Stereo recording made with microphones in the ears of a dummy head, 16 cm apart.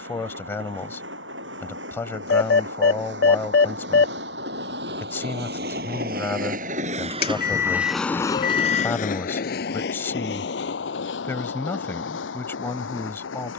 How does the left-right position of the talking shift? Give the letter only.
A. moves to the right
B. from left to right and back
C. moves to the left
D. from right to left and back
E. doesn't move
E.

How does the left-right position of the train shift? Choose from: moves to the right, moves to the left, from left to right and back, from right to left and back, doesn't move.
moves to the left.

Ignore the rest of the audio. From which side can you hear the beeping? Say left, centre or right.
left.